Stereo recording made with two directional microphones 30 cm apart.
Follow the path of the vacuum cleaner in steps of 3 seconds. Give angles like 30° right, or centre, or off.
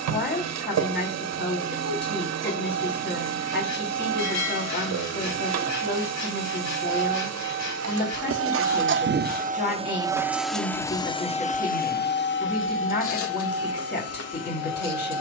60° right, 60° right, 50° right, centre, 50° left.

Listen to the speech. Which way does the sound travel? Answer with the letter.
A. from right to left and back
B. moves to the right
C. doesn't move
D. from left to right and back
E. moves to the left
C.